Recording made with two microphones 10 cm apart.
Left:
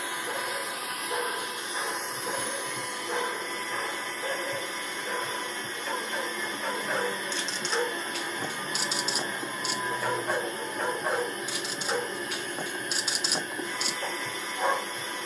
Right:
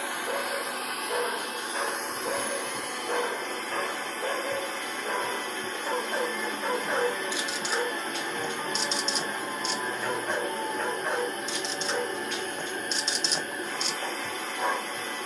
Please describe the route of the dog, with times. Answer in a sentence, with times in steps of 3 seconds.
In this clip you hear the dog on the right from 0 s and in the centre from 6 s.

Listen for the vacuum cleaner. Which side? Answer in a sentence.
In this clip you hear the vacuum cleaner on the right.